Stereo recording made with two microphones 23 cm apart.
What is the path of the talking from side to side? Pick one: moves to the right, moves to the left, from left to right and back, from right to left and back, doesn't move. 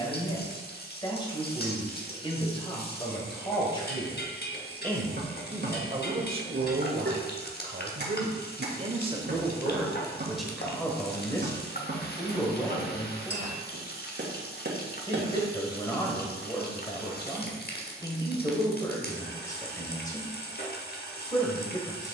from left to right and back.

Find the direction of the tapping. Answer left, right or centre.
right.